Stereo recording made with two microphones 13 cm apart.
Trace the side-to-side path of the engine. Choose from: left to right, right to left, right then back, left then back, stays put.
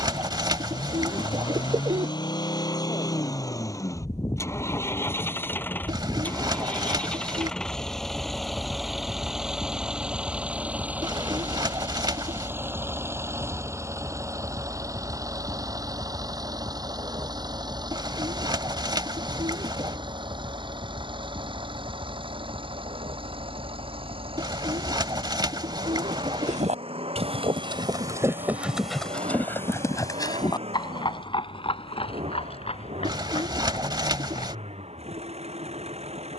left to right.